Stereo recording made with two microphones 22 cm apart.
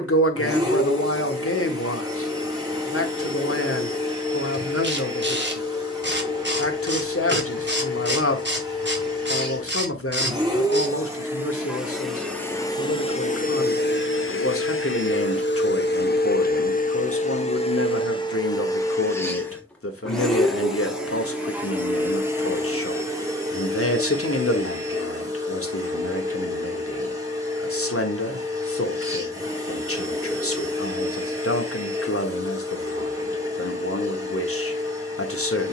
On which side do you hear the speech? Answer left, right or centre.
left.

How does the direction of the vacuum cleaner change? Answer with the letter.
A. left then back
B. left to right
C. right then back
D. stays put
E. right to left
A.